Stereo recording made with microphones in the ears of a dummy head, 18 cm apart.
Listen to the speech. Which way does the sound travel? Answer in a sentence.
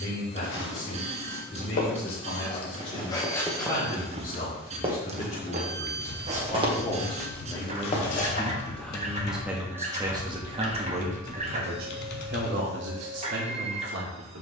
You can hear the speech move from left to right.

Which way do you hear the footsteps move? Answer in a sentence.
You can hear the footsteps move from left to right and back again.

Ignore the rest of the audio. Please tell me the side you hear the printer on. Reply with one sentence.
In this clip you hear the printer on the right.